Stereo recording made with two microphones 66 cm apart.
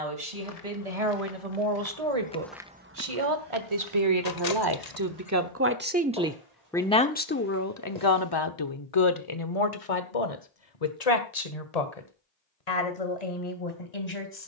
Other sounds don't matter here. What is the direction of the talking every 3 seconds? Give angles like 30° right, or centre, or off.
60° right, 40° right, 20° left, 60° left, 70° left.